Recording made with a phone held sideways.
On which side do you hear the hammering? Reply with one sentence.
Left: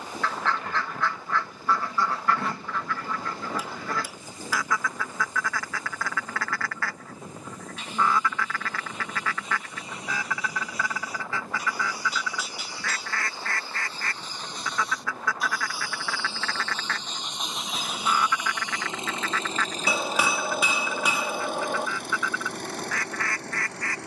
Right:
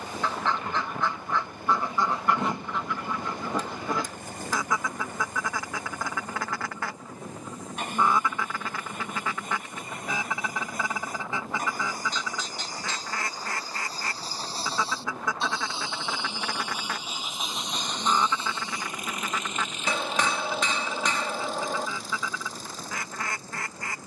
You can hear the hammering in the centre.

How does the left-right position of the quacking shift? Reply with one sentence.
You can hear the quacking stay in one place.